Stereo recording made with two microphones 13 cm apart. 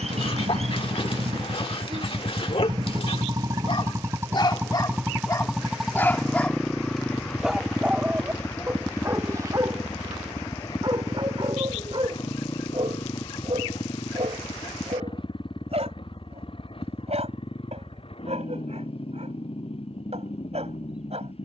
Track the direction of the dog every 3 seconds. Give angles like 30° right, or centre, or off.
50° left, 40° left, centre, 40° right, 50° right, 60° right, 60° right.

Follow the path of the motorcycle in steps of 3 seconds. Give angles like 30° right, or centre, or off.
50° right, 20° right, 10° left, 30° left, 40° left, 40° left, 50° left.